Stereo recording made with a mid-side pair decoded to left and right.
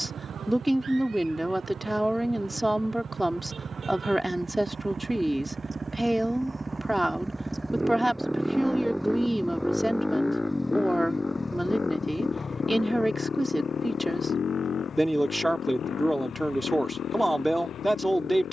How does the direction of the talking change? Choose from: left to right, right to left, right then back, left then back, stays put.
stays put.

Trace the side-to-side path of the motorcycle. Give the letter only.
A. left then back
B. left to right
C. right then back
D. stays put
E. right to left
E.